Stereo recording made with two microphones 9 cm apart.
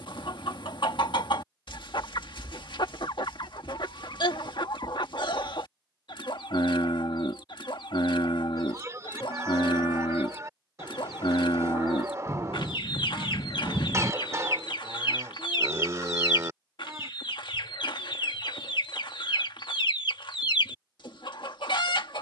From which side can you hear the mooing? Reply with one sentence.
In this clip you hear the mooing on the right.